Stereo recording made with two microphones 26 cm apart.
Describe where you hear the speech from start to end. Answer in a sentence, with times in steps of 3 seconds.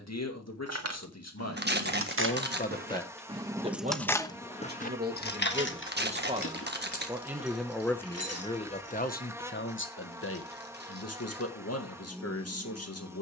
In this clip you hear the speech on the left from 0 s, on the right from 3 s, in the centre from 6 s and on the left from 9 s.